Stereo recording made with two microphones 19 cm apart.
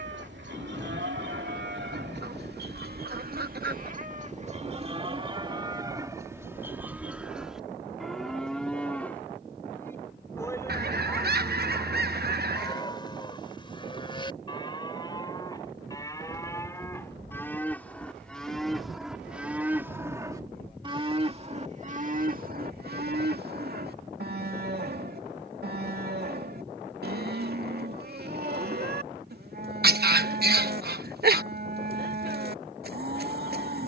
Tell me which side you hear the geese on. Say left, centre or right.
right.